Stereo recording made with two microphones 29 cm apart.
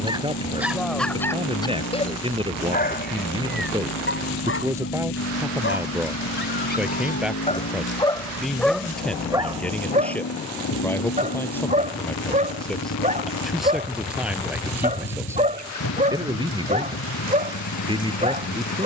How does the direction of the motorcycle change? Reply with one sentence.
You can hear the motorcycle stay put.